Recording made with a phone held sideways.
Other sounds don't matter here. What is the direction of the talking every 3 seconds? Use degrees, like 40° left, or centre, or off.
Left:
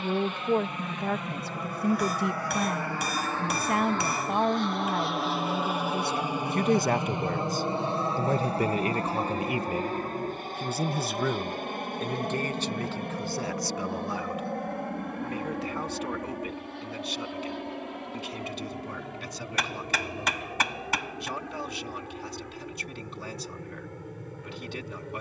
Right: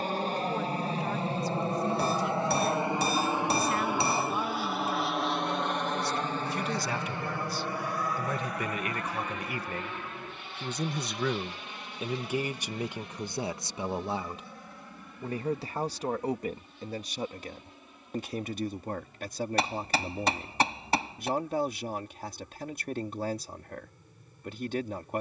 60° left, 60° left, 40° left, 10° left, 20° right, 40° right, 50° right, 50° right, 50° right.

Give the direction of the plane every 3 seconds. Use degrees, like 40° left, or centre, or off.
30° right, 10° right, 20° left, 40° left, 50° left, 60° left, 70° left, 70° left, 70° left.